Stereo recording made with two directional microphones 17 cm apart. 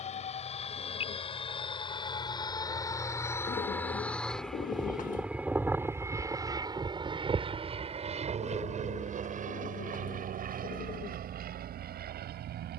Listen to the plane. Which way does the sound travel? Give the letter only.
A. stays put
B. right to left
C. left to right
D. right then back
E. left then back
C.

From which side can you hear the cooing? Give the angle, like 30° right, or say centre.
50° left.